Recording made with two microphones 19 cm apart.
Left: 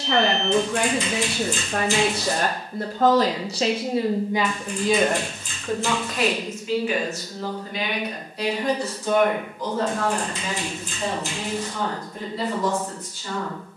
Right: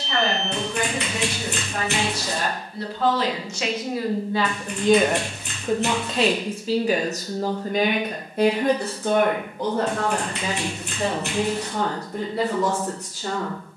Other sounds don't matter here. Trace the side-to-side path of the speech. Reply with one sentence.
In this clip you hear the speech move to the right.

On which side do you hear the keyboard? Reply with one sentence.
In this clip you hear the keyboard on the right.